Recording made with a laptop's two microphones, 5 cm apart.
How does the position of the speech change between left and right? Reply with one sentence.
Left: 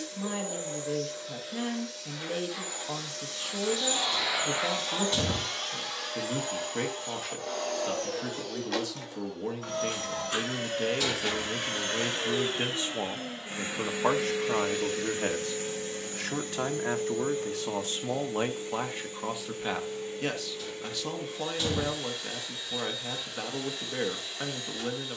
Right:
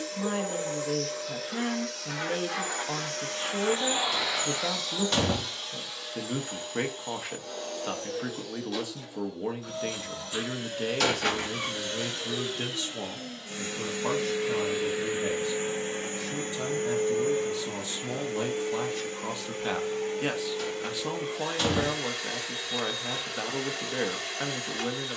You can hear the speech move from right to left and back again.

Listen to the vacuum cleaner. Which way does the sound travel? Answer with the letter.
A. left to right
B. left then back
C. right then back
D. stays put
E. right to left
B.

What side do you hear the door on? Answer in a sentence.
In this clip you hear the door on the right.